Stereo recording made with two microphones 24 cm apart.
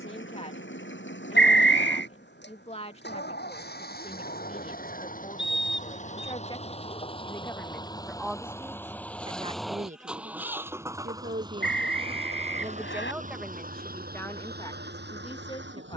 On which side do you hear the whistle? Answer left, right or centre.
left.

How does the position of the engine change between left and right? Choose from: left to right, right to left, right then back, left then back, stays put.
left to right.